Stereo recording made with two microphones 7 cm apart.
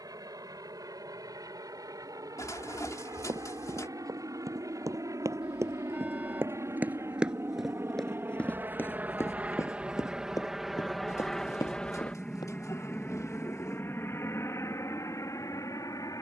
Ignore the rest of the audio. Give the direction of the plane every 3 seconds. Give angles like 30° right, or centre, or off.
70° right, 60° right, 40° right, 10° right, 30° left, 40° left.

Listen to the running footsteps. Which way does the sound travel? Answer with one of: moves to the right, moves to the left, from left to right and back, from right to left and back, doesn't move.
moves to the left.